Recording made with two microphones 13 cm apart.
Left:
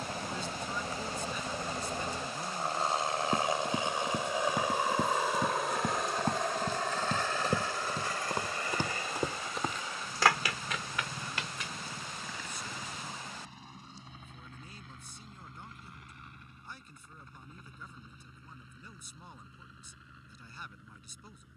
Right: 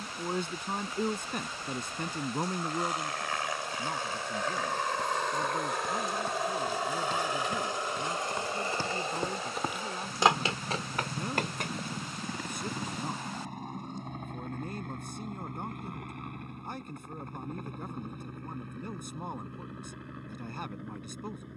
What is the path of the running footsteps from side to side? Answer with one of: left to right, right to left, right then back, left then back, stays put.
left to right.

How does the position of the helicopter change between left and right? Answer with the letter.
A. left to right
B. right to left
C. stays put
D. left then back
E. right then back
A.